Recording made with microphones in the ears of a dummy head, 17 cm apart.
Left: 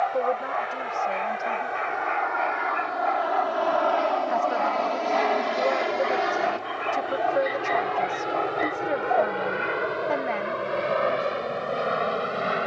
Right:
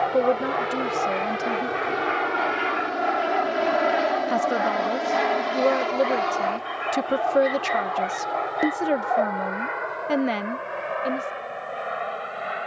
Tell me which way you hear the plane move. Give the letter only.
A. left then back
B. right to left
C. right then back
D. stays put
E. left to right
B.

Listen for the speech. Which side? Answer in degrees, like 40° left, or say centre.
40° right.